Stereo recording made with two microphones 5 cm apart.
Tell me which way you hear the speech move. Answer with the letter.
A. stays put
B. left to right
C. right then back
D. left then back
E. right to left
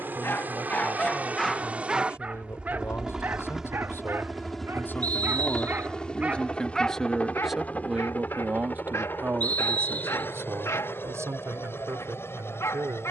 B.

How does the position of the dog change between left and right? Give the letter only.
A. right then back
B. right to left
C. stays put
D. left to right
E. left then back
A.